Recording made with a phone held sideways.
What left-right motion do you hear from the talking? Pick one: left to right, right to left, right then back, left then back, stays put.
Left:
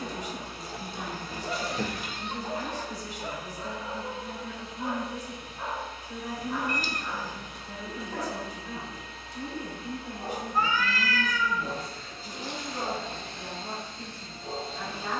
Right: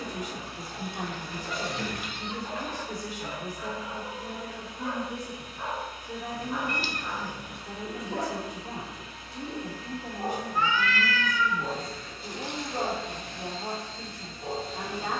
stays put.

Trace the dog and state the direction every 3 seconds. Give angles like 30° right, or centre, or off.
50° left, 20° left, 20° right, 40° right, 50° right.